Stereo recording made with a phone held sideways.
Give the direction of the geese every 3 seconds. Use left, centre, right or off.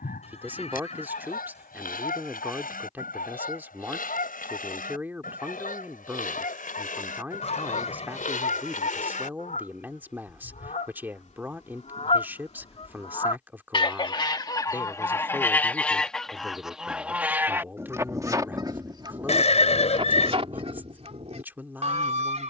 left, left, left, left, left, centre, right, right.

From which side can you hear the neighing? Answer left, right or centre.
left.